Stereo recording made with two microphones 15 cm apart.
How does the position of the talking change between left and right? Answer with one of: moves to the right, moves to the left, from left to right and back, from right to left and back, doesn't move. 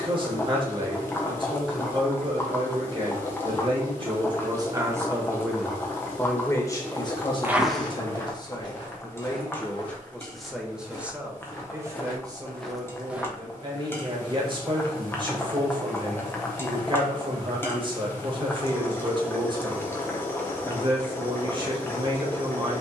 from right to left and back.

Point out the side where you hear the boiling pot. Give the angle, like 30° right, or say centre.
20° left.